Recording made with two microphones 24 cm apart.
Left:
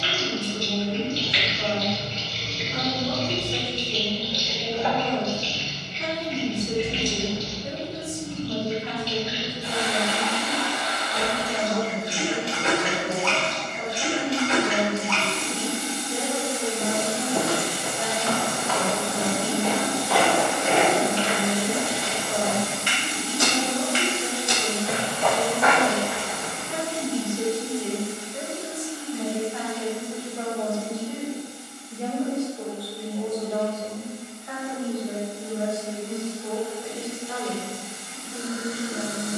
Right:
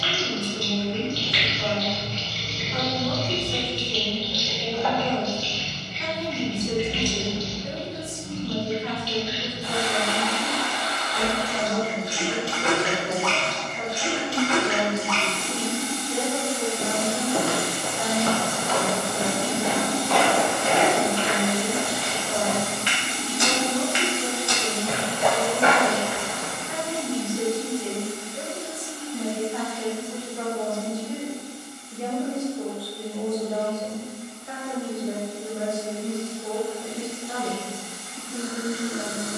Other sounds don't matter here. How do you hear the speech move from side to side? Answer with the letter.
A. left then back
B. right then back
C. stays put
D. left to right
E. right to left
D.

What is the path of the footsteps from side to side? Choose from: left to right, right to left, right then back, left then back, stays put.
left then back.